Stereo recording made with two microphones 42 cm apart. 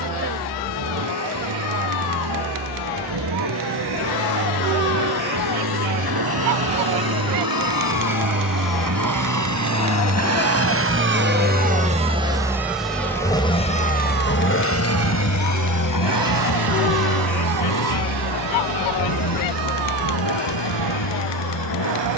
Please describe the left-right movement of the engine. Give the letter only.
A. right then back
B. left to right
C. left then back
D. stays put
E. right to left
E.